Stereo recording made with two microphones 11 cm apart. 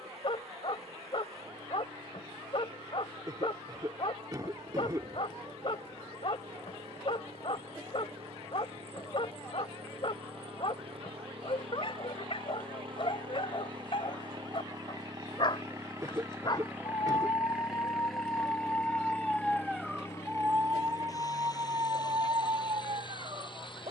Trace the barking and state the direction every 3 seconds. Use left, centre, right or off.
left, left, left, left, left, left, centre, right.